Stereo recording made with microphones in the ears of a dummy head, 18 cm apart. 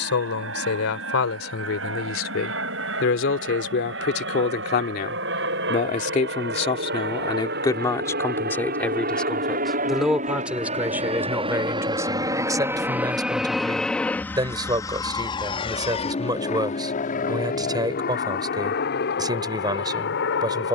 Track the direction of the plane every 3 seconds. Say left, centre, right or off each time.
right, right, right, right, centre, left, left.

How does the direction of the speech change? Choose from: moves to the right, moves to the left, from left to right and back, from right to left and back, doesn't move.
moves to the right.